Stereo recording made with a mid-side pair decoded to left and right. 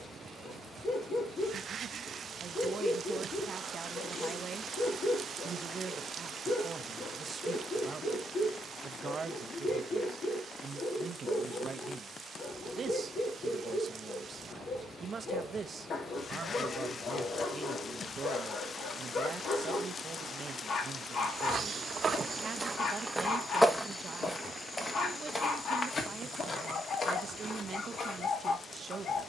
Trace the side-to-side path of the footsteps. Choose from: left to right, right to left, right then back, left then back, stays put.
right to left.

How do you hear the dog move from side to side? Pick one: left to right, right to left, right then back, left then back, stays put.
stays put.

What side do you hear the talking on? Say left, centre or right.
right.